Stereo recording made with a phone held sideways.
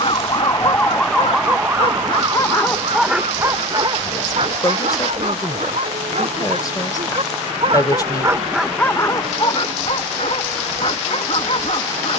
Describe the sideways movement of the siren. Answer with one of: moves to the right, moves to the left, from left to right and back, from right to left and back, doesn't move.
moves to the right.